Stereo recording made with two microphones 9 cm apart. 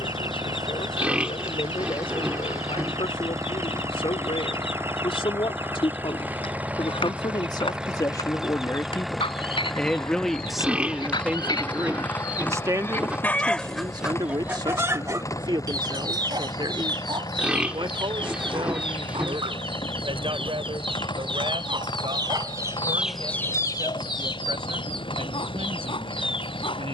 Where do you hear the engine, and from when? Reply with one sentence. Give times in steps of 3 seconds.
In this clip you hear the engine on the right from 0 s, in the centre from 6 s and on the left from 12 s.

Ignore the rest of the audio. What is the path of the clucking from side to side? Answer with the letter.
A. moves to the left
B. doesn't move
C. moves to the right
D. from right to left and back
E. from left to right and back
E.